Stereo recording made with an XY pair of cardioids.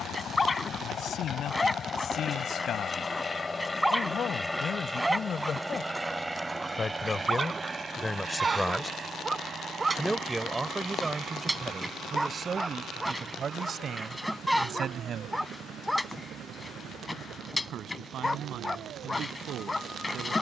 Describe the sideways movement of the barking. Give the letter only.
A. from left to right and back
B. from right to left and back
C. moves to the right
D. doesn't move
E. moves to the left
A.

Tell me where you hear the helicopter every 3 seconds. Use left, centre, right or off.
left, centre, right, right, right, right, right.